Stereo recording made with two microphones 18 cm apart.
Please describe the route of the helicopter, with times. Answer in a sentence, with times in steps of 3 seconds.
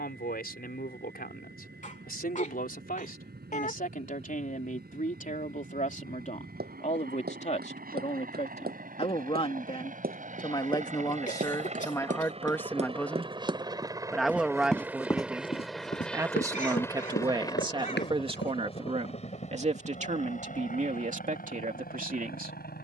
You can hear the helicopter on the right from 0 s, in the centre from 15 s and on the left from 18 s.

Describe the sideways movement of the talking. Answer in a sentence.
In this clip you hear the talking travel towards the right.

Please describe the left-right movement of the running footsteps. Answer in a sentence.
You can hear the running footsteps go from the right side to the left.